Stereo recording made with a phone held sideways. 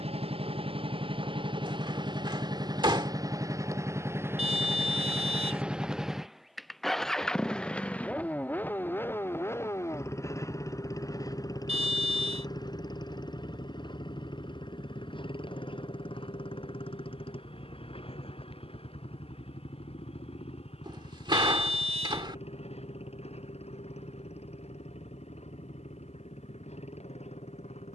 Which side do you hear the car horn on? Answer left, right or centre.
right.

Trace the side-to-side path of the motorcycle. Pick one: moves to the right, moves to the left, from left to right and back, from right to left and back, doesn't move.
moves to the left.